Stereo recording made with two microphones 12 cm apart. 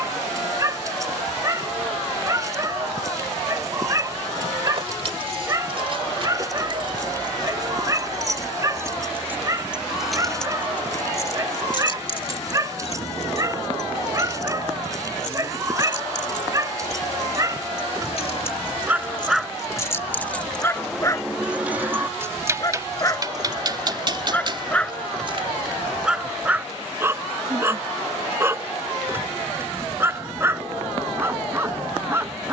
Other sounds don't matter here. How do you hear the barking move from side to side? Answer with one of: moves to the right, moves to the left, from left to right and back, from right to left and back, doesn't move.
from right to left and back.